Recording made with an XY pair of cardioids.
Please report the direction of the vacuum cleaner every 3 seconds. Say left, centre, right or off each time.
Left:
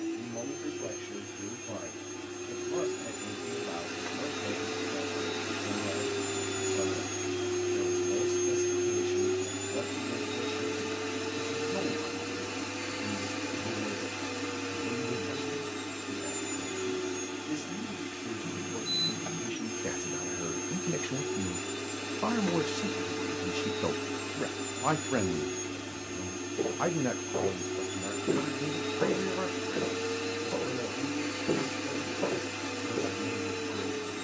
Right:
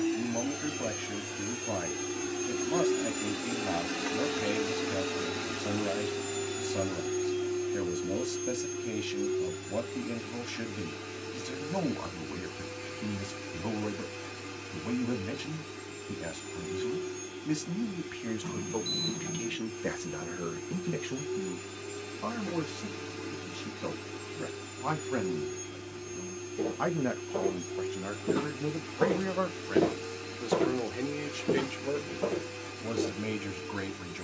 right, centre, left, left, left, left, left, left, left, left, left, left.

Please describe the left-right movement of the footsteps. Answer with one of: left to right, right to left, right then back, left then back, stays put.
right then back.